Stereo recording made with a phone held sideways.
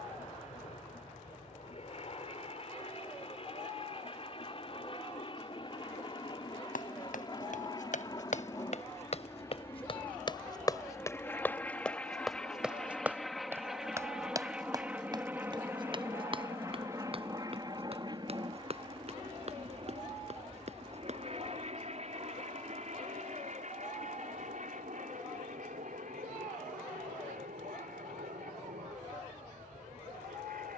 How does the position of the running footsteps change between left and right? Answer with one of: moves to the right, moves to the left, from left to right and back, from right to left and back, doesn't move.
moves to the right.